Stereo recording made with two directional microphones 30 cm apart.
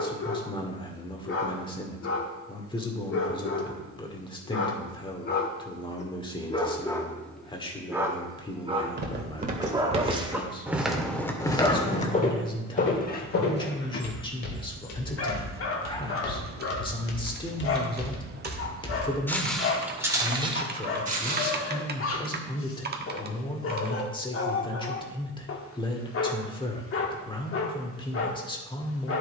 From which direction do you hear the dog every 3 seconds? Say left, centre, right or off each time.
left, left, centre, centre, left, left, left, left, left, left.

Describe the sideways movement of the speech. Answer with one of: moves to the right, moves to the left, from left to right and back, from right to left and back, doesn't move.
doesn't move.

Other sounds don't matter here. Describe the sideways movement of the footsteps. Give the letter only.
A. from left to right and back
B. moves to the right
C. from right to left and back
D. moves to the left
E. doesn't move
C.